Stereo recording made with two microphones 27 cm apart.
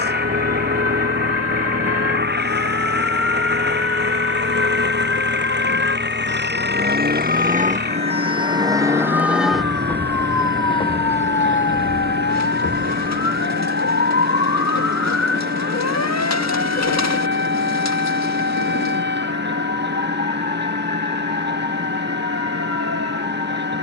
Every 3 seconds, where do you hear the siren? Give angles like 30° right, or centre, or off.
60° right, 50° right, 30° right, 10° left, 50° left, 60° left, 70° left, 80° left.